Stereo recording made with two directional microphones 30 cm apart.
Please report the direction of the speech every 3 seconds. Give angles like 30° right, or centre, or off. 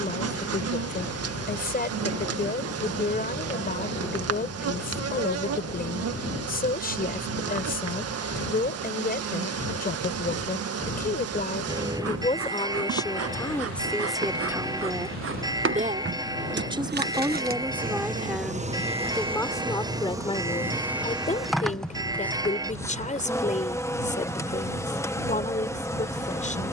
30° left, 30° left, 30° left, 30° left, 10° left, 10° right, 10° left, 20° left, 20° left.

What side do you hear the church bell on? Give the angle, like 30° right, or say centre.
10° right.